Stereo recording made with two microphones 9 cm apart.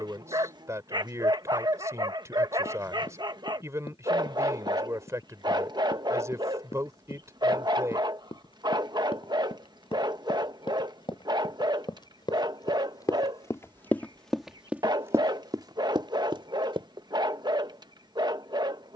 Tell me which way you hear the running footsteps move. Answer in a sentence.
You can hear the running footsteps go from the left side to the right.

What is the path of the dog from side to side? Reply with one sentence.
In this clip you hear the dog stay in one place.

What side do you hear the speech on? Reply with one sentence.
You can hear the speech on the right.